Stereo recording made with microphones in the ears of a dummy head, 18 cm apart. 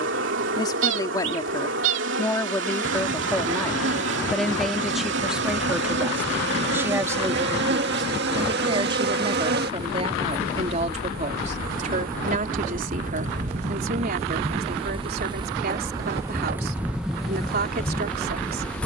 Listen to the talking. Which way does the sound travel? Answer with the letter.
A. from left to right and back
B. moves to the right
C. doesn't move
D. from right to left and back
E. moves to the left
B.